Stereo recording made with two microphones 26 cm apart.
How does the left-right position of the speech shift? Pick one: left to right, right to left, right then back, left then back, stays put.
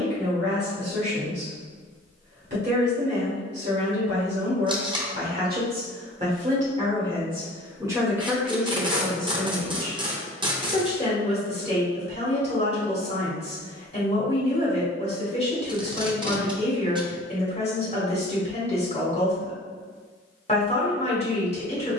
right to left.